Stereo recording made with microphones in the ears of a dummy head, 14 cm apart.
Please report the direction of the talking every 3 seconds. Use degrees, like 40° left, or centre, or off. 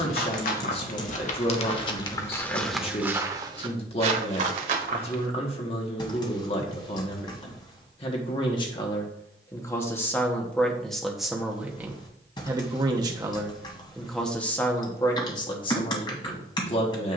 40° left, 40° left, 30° left, 10° left, centre, 30° left.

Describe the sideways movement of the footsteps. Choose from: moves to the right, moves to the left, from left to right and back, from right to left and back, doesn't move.
moves to the right.